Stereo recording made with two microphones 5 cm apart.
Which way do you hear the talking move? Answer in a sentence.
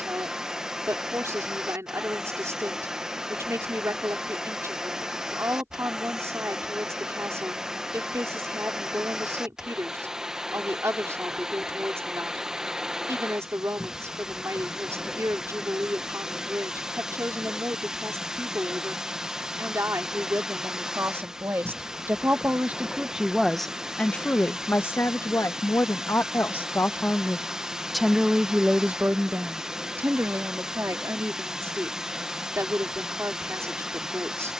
You can hear the talking go left and come back.